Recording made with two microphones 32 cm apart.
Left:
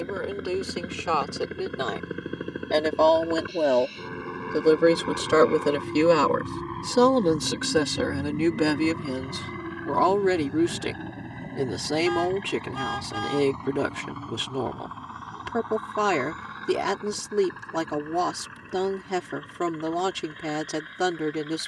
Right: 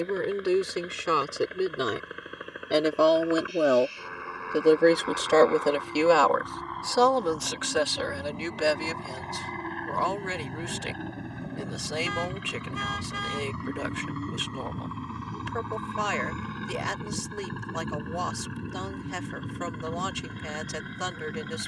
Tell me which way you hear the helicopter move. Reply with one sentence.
In this clip you hear the helicopter move to the right.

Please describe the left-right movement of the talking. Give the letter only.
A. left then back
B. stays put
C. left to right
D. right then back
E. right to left
E.